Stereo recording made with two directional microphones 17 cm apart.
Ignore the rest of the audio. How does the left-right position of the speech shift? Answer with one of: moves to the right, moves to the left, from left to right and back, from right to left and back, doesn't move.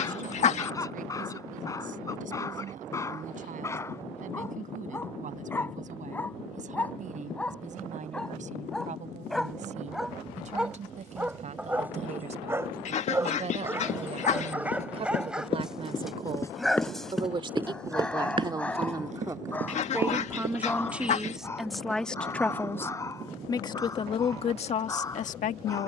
moves to the left.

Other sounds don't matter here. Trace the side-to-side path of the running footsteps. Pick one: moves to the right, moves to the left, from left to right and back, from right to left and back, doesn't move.
moves to the right.